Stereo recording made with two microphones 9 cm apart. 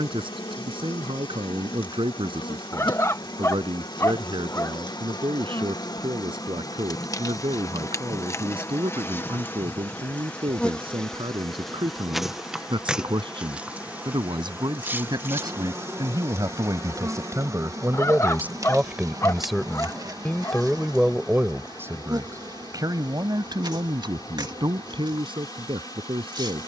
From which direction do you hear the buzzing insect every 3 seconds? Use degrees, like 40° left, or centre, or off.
70° left, 60° left, 40° left, 10° left, 10° right, 30° right, 40° right, 50° right, 50° right.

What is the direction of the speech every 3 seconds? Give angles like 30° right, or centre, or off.
70° right, 70° right, 70° right, 70° right, 60° right, 40° right, 10° right, 40° right, 60° right.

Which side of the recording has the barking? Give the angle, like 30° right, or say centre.
30° left.